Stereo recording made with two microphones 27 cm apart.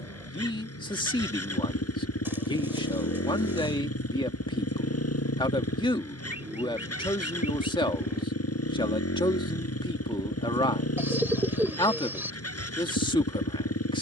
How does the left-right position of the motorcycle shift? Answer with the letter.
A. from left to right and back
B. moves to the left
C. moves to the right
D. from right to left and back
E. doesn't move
E.